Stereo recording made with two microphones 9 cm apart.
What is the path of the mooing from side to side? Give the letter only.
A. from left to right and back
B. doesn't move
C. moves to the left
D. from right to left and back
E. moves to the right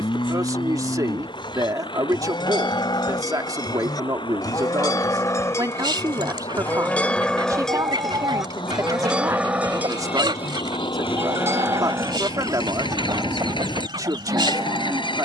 E.